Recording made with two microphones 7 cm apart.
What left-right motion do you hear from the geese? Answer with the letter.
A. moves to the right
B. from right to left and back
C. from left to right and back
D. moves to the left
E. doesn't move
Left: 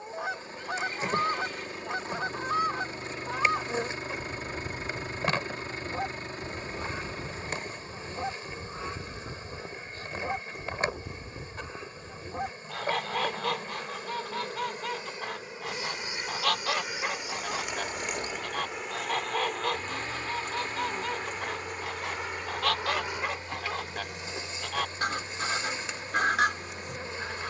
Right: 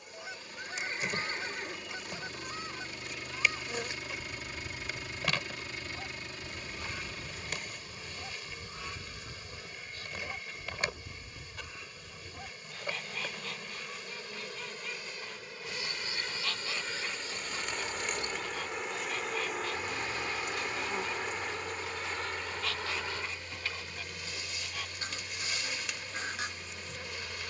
E.